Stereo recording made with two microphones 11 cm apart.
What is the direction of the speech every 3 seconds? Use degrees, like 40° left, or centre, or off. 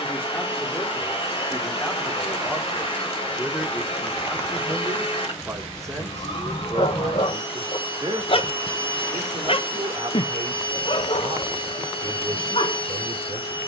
10° left, 20° right, 40° right, 50° right, 60° right.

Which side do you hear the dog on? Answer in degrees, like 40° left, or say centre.
50° left.